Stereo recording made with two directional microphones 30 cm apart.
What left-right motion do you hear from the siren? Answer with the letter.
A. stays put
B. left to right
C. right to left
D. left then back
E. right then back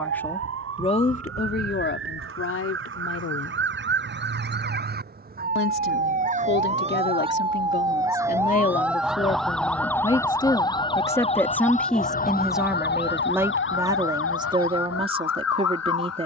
C.